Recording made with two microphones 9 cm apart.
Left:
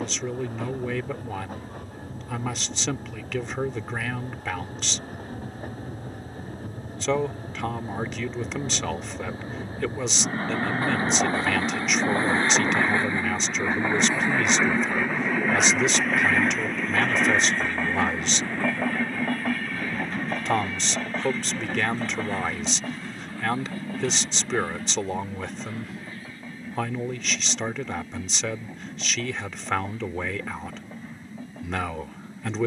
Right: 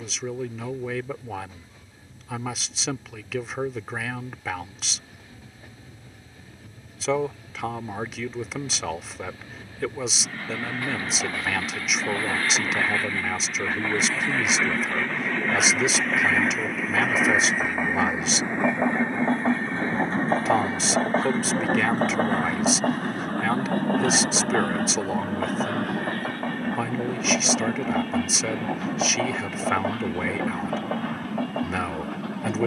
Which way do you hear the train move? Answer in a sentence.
You can hear the train move from left to right.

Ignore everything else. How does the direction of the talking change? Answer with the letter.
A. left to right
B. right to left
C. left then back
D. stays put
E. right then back
D.